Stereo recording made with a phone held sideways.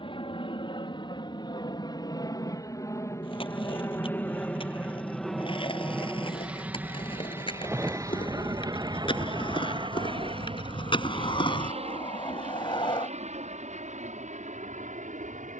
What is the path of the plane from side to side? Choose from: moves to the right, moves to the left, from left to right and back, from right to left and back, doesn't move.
moves to the right.